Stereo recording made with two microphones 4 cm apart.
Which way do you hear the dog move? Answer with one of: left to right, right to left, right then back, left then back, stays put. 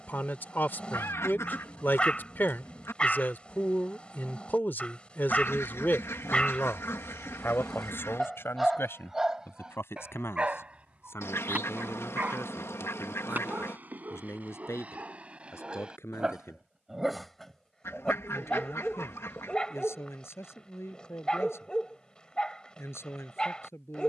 right then back.